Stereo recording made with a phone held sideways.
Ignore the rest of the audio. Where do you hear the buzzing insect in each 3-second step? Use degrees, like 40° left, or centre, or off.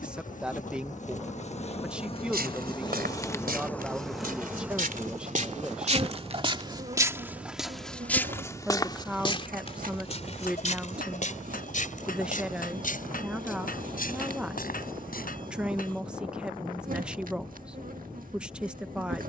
40° left, centre, 50° right, 60° right, 60° right, 60° right, 60° right.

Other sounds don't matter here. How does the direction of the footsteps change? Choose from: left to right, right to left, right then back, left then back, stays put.
right to left.